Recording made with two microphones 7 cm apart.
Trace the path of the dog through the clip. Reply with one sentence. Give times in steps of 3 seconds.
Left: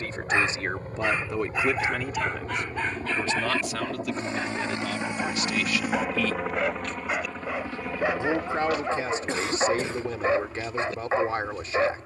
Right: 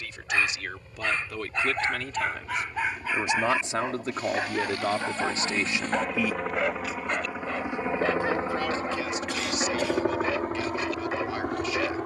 You can hear the dog in the centre from 0 s and on the left from 9 s.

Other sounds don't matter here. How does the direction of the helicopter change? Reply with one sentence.
In this clip you hear the helicopter move from left to right.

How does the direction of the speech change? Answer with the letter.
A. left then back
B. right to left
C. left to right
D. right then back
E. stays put
D.